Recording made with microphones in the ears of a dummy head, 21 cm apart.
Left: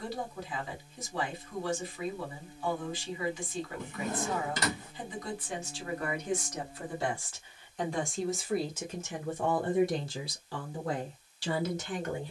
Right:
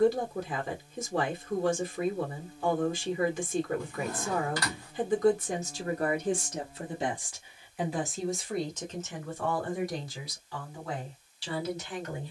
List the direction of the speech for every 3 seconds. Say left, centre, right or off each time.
right, right, centre, left.